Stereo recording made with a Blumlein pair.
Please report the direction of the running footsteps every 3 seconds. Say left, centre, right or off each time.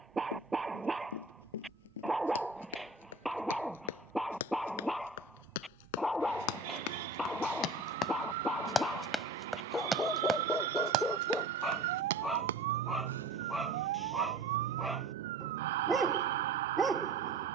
left, left, left, right, right, off.